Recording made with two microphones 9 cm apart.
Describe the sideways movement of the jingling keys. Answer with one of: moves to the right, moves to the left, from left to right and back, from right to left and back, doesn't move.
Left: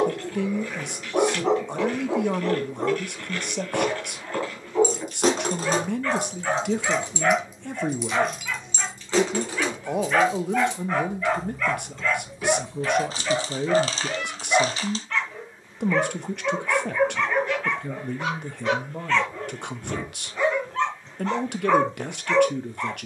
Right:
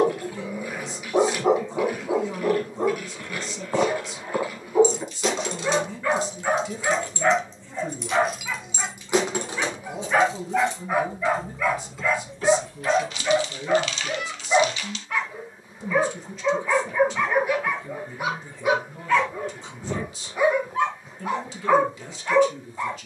from left to right and back.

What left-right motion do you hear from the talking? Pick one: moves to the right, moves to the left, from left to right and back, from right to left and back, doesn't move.
doesn't move.